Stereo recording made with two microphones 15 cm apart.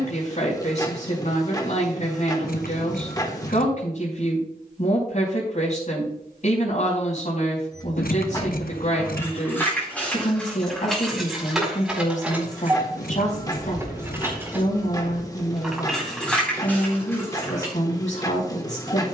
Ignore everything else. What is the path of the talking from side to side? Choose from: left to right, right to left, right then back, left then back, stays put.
stays put.